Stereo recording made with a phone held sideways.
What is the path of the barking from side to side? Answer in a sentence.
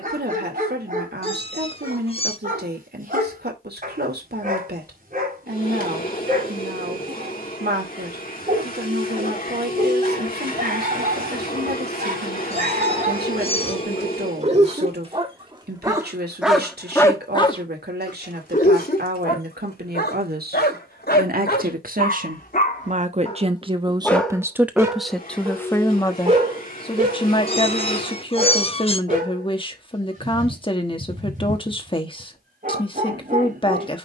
You can hear the barking move from right to left and back again.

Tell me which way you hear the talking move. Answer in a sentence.
You can hear the talking move to the left.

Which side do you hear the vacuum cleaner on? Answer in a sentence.
In this clip you hear the vacuum cleaner on the left.